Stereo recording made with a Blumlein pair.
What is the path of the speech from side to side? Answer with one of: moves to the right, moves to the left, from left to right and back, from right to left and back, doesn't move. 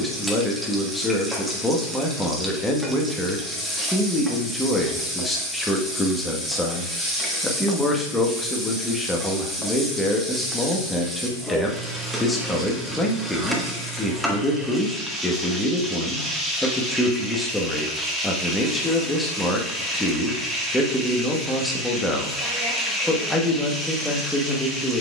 doesn't move.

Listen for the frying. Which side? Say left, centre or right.
centre.